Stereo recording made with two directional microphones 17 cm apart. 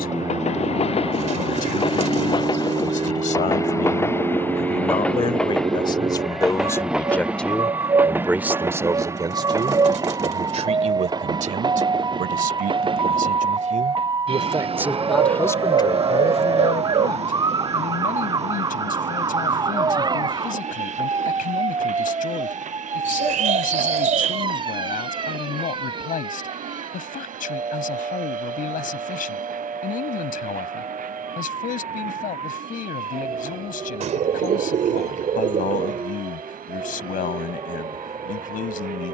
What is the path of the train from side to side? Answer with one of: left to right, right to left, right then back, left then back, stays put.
left to right.